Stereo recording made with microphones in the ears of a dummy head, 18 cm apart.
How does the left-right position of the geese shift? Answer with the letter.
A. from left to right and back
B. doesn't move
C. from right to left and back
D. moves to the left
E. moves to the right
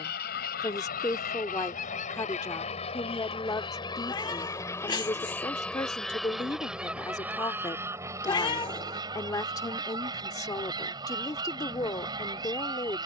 E.